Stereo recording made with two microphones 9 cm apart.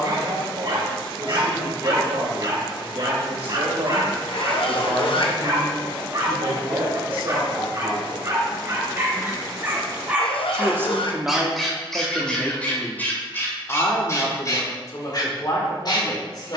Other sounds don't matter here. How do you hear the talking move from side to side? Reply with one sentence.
In this clip you hear the talking go from the right side to the left.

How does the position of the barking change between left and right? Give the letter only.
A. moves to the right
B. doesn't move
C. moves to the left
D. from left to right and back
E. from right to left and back
C.